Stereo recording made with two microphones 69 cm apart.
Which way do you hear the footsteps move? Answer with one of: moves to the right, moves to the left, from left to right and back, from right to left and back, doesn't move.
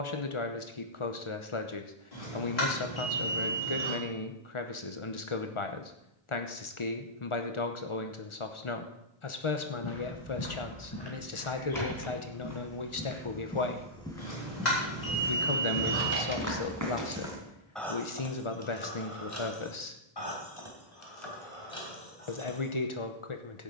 moves to the right.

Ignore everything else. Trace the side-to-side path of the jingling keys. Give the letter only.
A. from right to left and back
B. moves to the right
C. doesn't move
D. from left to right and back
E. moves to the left
E.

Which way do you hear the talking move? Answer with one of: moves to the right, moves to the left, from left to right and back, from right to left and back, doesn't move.
doesn't move.